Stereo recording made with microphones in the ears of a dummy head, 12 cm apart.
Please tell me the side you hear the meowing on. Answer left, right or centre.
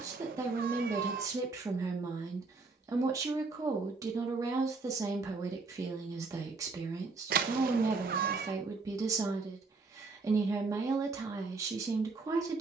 right.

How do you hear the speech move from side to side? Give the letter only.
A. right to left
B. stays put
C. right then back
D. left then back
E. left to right
B.